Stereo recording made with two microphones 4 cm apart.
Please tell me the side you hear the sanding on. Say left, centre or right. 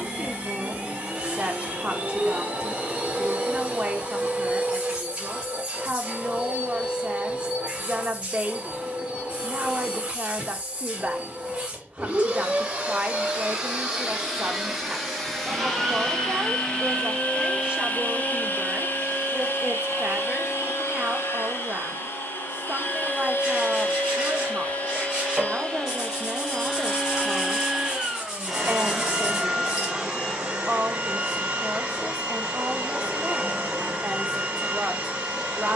centre.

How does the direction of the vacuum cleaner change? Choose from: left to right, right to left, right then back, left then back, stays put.
left then back.